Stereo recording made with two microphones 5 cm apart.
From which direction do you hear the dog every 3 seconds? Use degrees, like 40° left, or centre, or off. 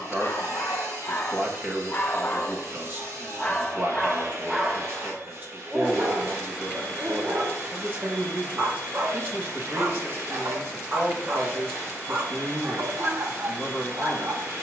40° left, centre, 50° right, 50° right, 50° right.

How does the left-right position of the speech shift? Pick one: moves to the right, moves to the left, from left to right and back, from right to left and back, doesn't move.
doesn't move.